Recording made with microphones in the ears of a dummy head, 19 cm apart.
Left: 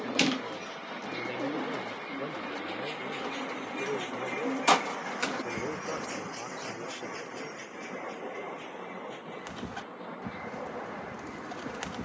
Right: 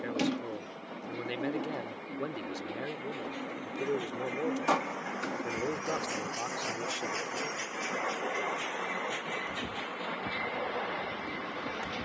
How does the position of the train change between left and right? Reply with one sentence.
You can hear the train travel towards the right.